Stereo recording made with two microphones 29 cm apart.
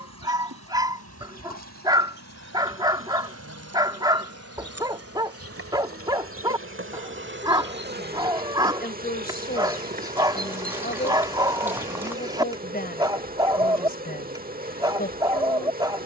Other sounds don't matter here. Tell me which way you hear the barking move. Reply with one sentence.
You can hear the barking stay in one place.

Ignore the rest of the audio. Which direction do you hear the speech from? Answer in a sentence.
In this clip you hear the speech on the left.